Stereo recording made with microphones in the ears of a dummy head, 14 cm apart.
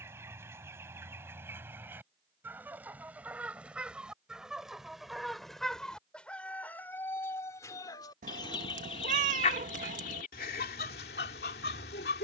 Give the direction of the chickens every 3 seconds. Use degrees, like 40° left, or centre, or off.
10° right, centre, 20° left, 60° left.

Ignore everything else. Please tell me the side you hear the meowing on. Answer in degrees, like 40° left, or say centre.
50° right.